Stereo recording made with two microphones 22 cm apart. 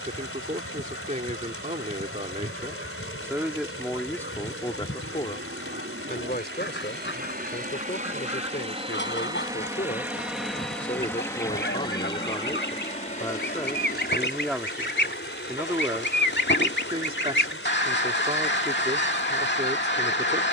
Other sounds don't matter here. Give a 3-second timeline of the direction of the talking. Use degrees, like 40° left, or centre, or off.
30° right, 10° left, 50° left, 40° left, 10° left, 20° right, 30° right.